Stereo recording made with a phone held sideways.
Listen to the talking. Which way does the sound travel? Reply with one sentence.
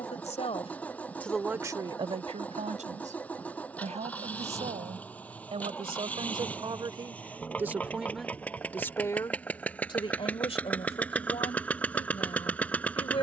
In this clip you hear the talking go right and come back.